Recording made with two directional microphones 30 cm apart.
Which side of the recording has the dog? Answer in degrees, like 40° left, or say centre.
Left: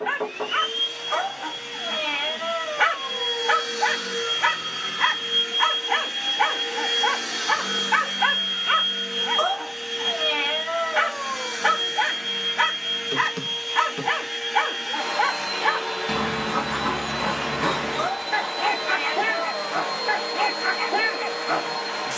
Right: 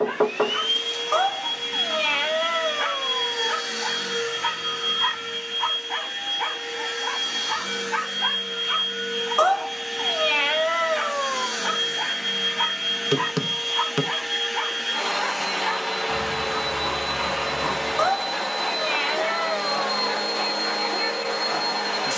50° left.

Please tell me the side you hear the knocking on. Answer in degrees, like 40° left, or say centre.
50° right.